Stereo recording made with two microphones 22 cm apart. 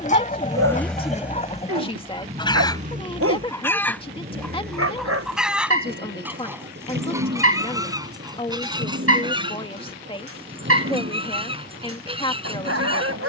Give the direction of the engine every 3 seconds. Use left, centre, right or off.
centre, right, right, right, right.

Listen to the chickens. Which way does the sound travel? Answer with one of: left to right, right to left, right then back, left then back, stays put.
left to right.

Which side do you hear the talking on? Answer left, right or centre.
left.